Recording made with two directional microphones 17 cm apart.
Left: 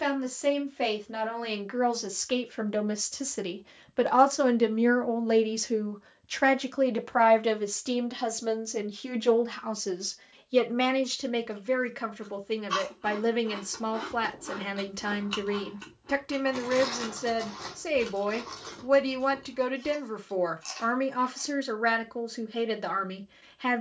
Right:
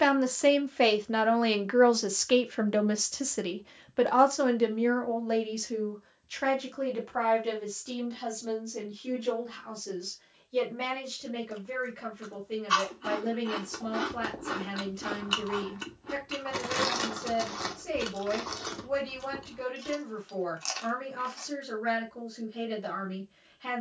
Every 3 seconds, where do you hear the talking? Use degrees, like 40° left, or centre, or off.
20° right, 20° left, 50° left, 70° left, 70° left, 70° left, 70° left, 70° left.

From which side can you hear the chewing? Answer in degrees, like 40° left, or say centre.
30° right.